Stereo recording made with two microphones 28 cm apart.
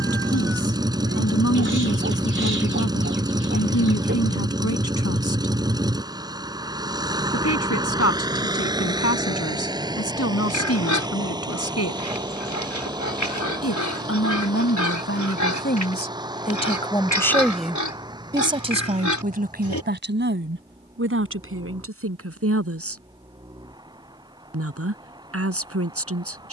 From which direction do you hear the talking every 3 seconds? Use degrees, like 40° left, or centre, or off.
60° left, 60° left, 60° left, 60° left, 50° left, 20° left, 30° right, 50° right, 50° right.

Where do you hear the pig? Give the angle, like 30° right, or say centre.
80° left.